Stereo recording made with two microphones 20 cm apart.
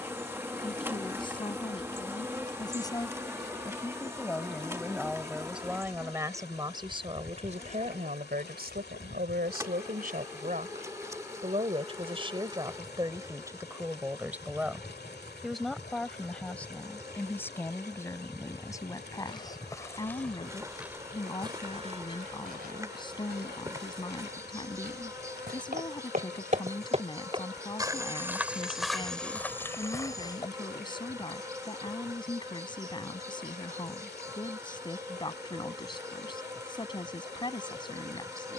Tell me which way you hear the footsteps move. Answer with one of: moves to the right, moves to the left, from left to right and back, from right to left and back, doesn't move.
from left to right and back.